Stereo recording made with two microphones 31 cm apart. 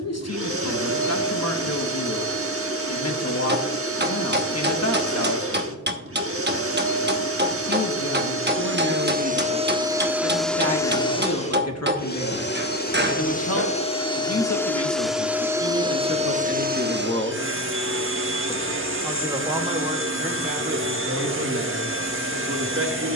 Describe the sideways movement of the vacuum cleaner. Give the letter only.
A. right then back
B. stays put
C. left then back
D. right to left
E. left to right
C.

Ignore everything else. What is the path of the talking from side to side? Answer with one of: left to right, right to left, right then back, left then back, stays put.
left to right.